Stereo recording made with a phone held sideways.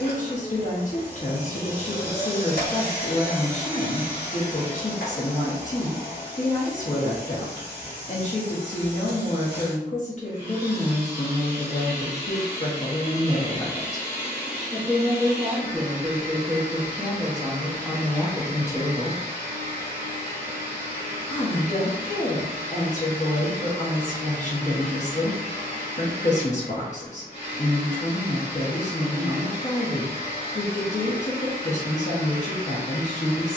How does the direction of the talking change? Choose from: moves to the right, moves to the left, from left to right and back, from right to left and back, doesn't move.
from left to right and back.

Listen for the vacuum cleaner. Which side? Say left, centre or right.
left.